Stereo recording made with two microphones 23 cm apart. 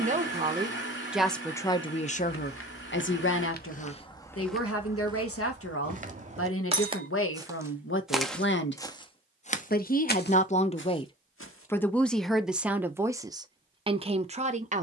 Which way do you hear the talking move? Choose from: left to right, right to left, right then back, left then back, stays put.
left then back.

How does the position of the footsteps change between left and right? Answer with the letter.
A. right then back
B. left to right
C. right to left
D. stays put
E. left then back
A.